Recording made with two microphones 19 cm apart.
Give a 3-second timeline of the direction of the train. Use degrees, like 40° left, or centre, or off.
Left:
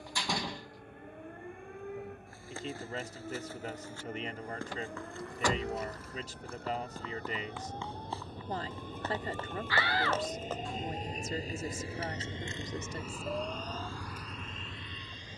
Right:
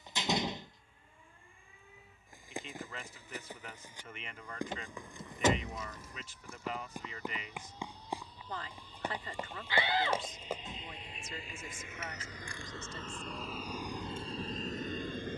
70° left, 70° left, 60° left, 50° left, 10° right.